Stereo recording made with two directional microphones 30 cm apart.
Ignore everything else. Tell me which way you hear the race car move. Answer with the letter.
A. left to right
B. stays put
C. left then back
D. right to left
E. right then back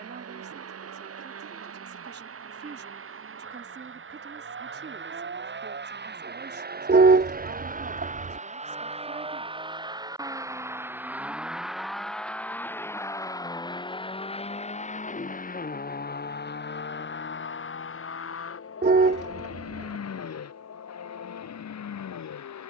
D.